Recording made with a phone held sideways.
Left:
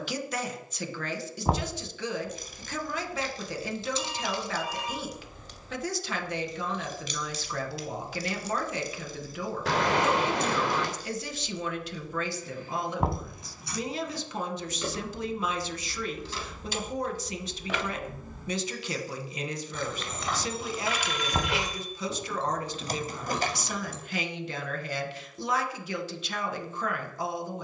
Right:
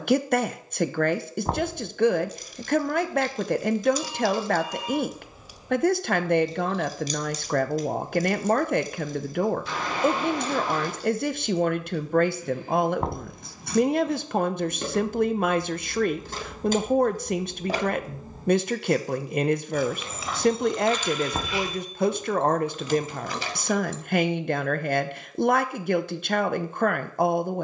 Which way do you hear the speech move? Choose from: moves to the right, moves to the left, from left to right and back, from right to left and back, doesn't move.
doesn't move.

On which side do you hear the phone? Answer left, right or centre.
left.